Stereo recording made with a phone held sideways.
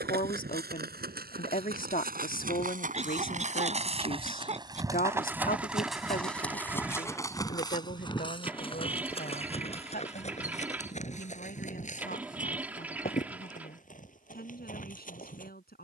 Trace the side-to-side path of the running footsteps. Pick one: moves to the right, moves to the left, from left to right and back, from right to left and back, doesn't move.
moves to the left.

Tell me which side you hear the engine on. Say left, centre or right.
centre.